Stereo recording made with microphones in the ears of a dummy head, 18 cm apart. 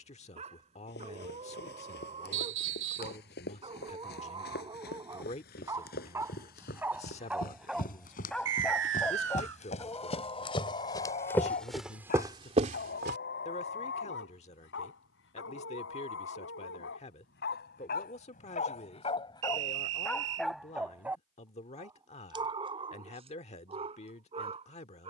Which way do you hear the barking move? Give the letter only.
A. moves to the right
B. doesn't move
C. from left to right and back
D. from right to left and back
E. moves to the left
D.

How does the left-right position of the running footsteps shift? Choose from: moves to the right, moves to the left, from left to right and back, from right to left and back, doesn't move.
moves to the right.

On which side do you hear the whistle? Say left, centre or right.
right.